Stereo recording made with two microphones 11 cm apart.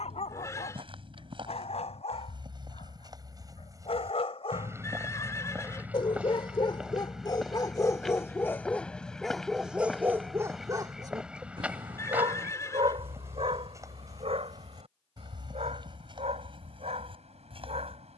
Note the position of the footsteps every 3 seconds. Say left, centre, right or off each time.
right, right, centre, centre, right, right.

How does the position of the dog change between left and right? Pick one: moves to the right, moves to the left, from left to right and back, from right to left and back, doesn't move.
moves to the right.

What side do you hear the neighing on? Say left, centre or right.
left.